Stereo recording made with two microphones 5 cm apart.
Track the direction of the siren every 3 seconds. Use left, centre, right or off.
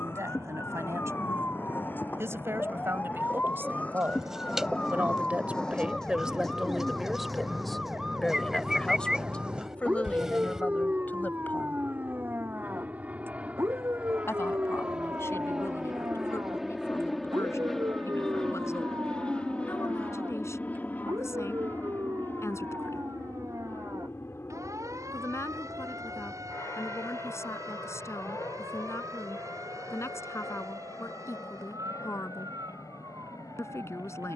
left, left, centre, right, right, right, right, right, right, right, right, right.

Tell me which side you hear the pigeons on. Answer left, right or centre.
centre.